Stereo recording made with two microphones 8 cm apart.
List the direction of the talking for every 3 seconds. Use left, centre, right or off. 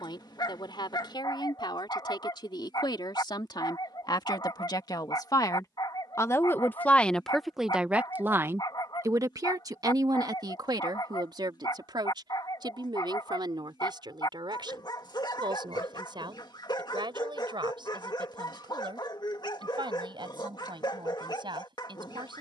left, left, centre, right, right, right, right, right.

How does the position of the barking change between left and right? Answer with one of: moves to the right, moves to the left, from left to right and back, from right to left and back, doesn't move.
doesn't move.